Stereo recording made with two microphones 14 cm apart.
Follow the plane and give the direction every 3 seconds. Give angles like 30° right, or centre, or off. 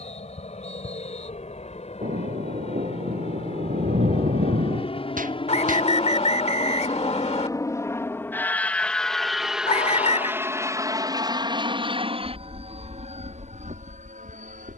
60° left, 50° left, 20° left, 20° right, 50° right.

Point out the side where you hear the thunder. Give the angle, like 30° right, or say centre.
80° right.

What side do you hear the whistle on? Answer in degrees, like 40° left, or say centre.
50° left.